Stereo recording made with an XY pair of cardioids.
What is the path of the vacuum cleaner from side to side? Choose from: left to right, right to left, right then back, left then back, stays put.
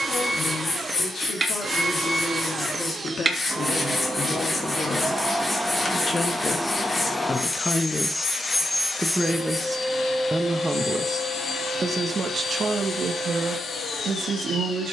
right to left.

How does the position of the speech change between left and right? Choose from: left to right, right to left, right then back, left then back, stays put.
left to right.